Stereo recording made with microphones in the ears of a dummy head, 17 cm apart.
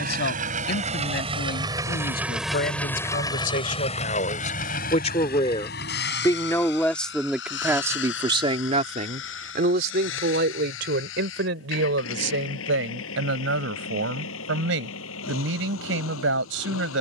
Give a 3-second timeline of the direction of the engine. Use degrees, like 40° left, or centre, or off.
20° right, 40° left, 70° left, 80° left, 80° left, 80° left.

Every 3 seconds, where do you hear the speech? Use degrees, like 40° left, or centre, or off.
60° left, 40° left, 10° right, 60° right, 80° right, 80° right.